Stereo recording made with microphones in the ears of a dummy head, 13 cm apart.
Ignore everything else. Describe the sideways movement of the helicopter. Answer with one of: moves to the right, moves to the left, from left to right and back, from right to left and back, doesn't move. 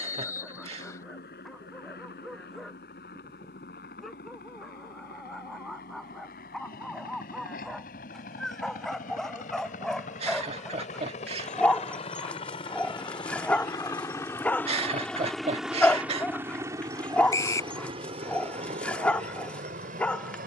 moves to the right.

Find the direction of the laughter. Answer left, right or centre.
right.